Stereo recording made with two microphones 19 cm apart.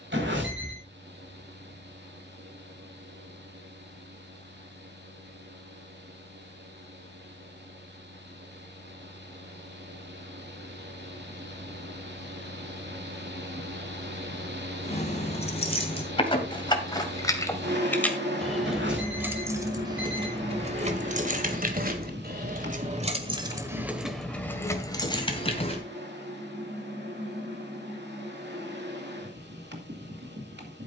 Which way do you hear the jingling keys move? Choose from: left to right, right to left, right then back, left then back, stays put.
right then back.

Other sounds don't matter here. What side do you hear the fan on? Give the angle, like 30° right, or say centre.
60° right.